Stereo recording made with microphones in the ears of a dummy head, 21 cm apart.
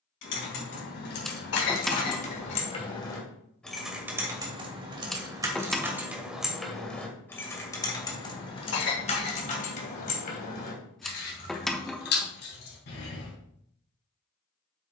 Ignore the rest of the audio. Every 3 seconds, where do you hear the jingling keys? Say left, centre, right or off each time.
left, centre, centre, left, left.